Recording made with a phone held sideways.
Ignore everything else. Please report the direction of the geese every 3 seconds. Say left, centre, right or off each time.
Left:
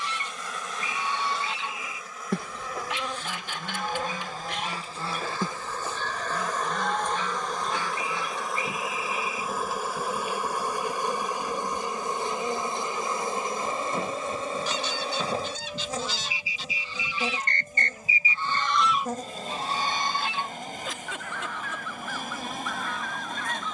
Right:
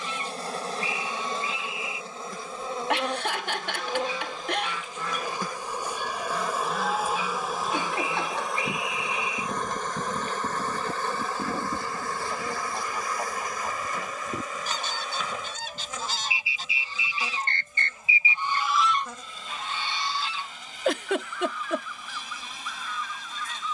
left, left, centre, right, right, right, left, left.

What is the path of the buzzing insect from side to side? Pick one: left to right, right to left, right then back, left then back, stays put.
right to left.